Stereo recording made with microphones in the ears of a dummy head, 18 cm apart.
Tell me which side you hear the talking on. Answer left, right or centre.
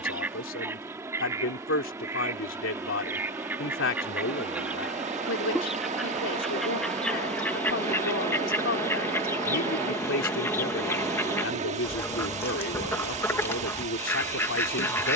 left.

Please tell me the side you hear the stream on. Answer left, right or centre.
right.